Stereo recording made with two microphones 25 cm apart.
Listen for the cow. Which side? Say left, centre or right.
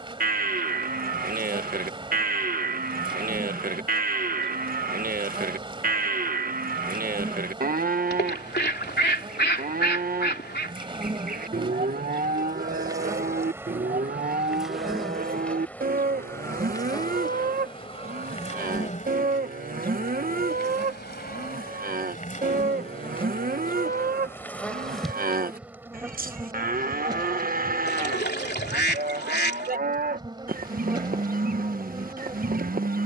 right.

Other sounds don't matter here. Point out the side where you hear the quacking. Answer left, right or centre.
left.